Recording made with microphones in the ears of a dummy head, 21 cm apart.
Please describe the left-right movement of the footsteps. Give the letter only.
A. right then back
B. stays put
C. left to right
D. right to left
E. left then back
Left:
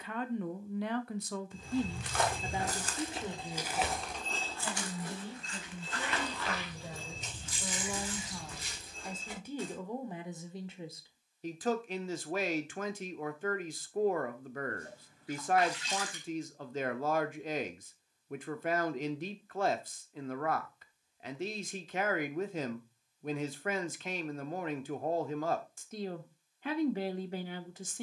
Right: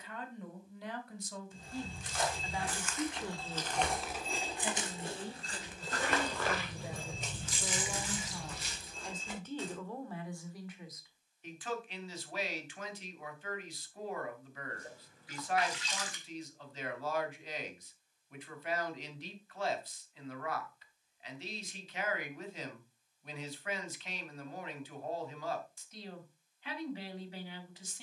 C.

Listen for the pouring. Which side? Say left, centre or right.
right.